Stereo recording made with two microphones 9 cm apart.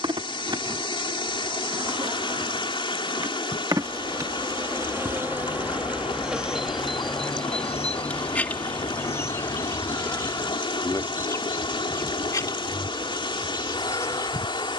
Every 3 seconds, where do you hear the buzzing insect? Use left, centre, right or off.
right, right, centre, left, left.